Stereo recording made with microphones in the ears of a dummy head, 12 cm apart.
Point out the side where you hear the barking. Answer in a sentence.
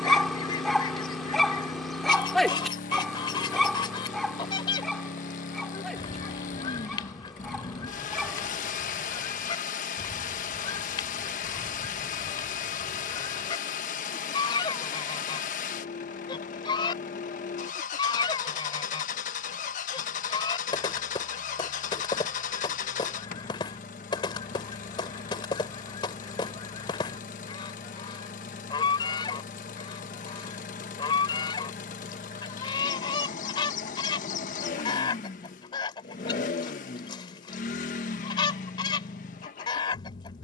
You can hear the barking in the centre.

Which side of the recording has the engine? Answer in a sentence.
You can hear the engine on the left.